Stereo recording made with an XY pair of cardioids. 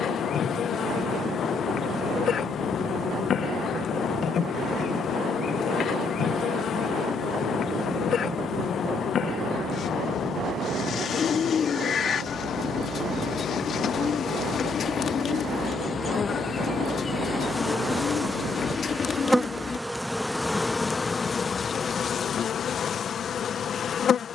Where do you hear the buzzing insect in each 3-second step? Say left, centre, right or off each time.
left, left, left, left, left, left, centre, left.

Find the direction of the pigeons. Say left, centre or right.
left.